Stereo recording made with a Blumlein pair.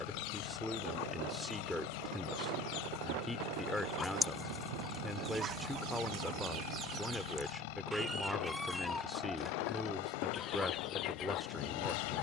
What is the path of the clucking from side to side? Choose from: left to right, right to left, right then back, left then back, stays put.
right then back.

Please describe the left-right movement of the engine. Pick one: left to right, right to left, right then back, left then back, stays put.
stays put.